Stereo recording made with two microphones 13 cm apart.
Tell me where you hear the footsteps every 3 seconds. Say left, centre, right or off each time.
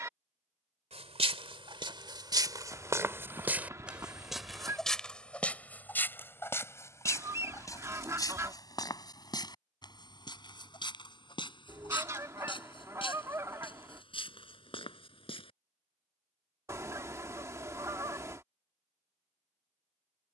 right, centre, left, left, left, left, off.